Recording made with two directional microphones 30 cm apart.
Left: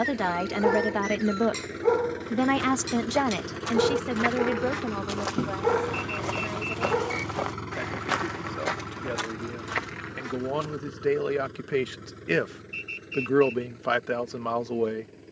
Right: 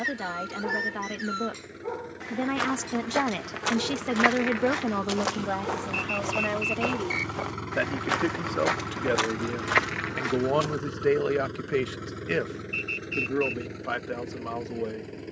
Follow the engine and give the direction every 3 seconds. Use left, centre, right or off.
left, left, centre, right, right.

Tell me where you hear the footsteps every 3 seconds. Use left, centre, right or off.
right, right, centre, right, off.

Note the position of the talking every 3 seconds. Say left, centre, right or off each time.
left, right, right, right, left.